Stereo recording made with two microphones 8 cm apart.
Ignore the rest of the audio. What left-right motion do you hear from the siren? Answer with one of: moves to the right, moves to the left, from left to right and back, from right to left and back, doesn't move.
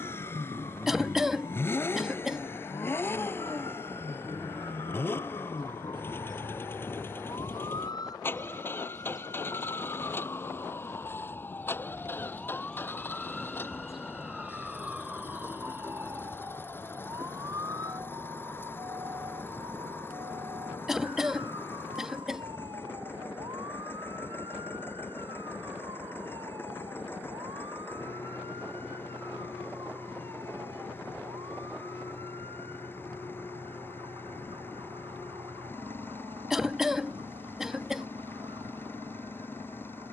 moves to the right.